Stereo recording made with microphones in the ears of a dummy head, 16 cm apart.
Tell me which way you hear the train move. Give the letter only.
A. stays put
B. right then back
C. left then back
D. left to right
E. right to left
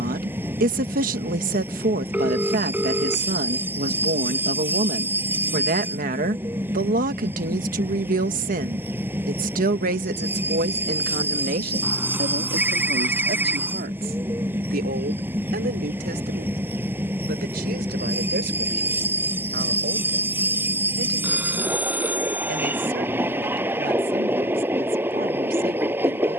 A.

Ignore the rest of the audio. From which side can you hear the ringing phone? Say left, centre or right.
centre.